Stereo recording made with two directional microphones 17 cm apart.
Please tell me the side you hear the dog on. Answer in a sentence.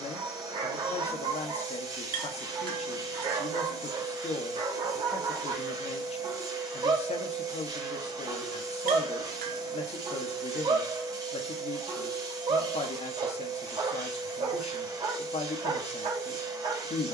In this clip you hear the dog on the right.